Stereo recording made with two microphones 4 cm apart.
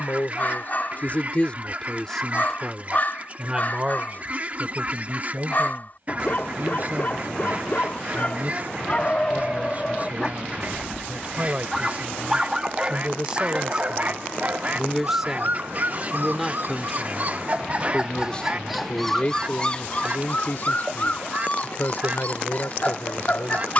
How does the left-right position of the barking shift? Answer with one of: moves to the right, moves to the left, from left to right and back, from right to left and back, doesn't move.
from left to right and back.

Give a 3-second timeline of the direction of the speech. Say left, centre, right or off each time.
left, right, right, right, right, centre, left, left.